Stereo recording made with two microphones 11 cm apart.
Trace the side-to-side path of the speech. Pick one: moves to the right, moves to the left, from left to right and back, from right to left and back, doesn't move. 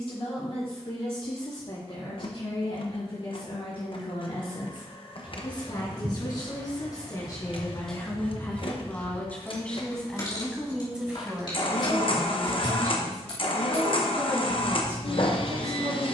moves to the right.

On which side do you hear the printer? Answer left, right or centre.
left.